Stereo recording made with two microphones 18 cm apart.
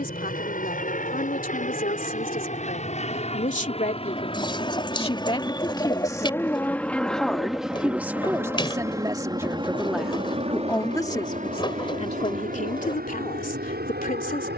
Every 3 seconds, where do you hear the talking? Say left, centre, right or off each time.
left, left, centre, centre, left.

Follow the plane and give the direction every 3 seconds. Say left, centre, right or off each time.
left, left, centre, right, right.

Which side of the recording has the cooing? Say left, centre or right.
left.